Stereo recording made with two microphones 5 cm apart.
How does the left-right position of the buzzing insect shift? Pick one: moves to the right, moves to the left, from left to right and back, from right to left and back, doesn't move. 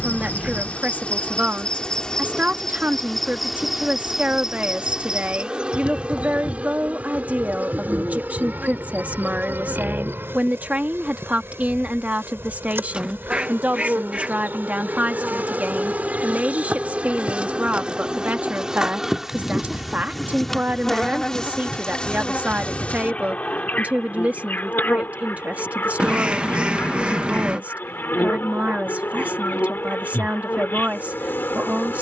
from left to right and back.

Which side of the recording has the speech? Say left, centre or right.
right.